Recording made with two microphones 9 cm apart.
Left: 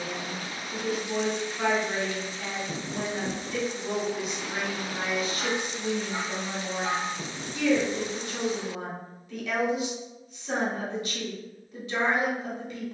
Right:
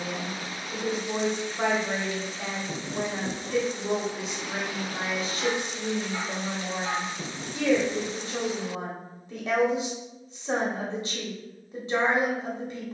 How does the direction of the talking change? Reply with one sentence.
You can hear the talking stay put.